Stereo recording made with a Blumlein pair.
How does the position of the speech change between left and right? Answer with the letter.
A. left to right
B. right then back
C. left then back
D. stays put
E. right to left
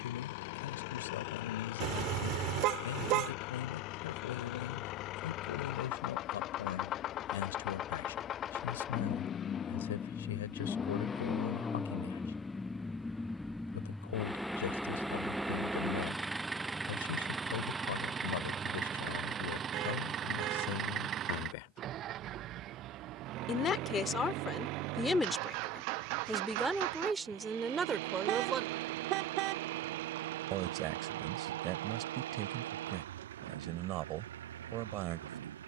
A.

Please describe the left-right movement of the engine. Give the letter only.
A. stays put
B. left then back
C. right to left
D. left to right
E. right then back
D.